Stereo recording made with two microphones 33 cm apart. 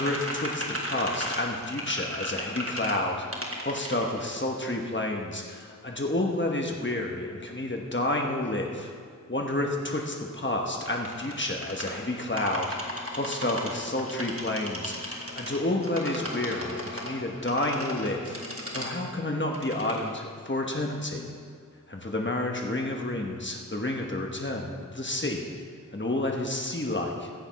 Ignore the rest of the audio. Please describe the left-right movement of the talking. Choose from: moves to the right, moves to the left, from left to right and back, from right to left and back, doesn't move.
doesn't move.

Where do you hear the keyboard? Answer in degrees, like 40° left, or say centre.
40° right.